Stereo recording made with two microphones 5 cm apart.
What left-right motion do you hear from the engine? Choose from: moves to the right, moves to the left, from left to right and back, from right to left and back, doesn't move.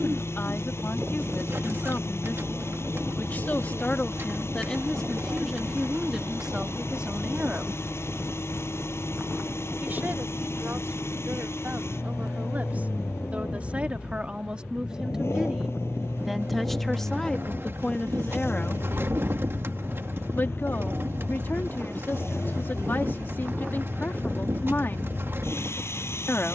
doesn't move.